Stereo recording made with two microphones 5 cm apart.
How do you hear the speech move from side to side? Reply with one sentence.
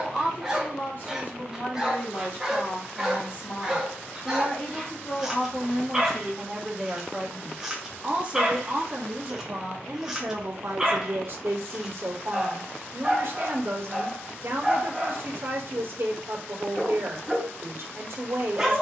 You can hear the speech go from the left side to the right.